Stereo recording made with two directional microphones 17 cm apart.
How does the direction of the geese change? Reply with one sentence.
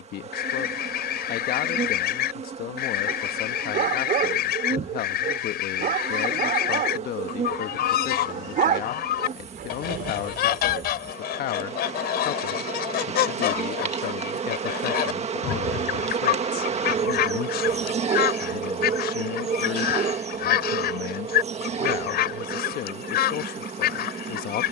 You can hear the geese stay put.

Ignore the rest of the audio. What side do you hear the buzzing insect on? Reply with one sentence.
In this clip you hear the buzzing insect on the right.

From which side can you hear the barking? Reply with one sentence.
In this clip you hear the barking on the right.